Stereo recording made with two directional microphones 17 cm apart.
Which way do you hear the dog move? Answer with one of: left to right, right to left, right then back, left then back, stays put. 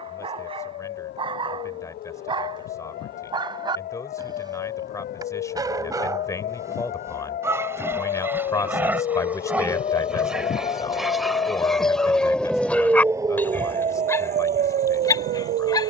right to left.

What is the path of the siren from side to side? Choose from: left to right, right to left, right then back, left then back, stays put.
left to right.